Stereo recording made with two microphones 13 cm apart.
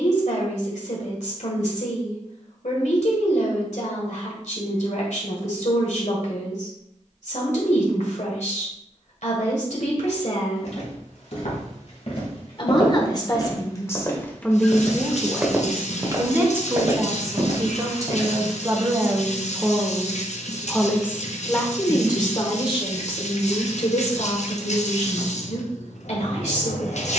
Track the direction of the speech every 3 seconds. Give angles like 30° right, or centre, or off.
70° left, 70° left, 70° left, 60° left, 20° left, 20° right, 10° right, 40° left, 60° left.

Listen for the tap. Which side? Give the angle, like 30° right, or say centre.
60° left.